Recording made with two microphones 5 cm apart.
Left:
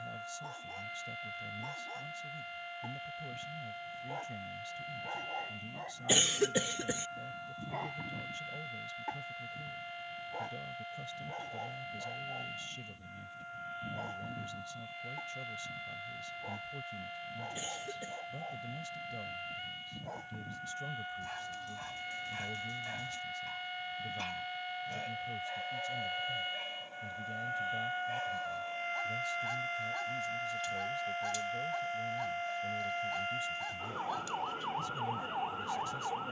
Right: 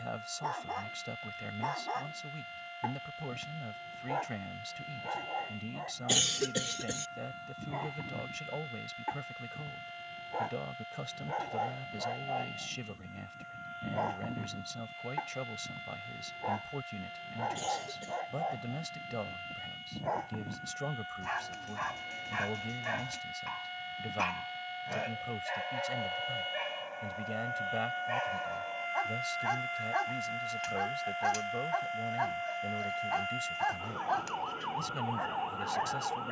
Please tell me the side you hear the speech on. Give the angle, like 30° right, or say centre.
80° right.